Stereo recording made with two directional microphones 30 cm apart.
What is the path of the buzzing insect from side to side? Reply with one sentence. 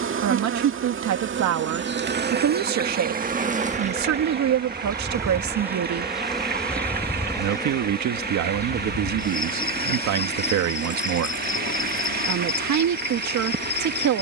You can hear the buzzing insect move to the left.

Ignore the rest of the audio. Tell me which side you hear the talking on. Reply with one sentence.
You can hear the talking on the right.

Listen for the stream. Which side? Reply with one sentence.
You can hear the stream on the right.